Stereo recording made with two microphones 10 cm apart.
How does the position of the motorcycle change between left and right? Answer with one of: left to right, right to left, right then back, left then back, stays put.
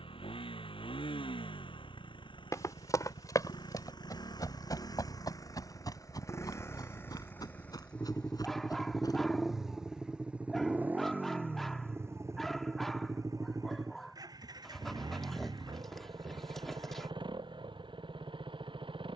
left to right.